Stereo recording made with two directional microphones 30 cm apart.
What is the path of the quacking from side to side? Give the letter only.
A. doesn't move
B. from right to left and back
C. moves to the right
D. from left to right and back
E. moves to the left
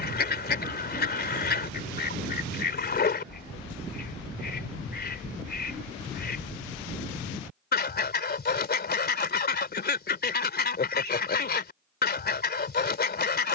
A.